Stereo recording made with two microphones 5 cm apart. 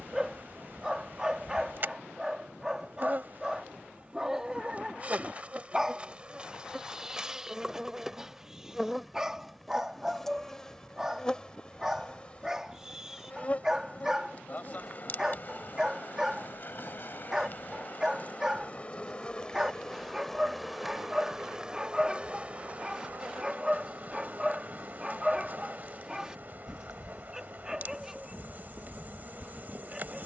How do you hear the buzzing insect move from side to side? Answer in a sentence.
You can hear the buzzing insect move from right to left and back again.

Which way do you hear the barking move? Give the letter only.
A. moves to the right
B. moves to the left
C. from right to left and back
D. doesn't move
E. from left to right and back
D.